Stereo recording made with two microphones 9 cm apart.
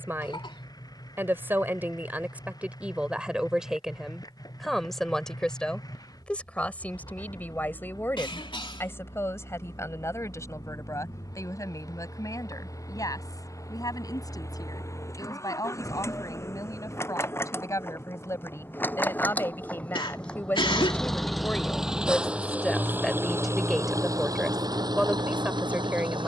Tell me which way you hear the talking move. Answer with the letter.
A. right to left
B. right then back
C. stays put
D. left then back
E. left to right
D.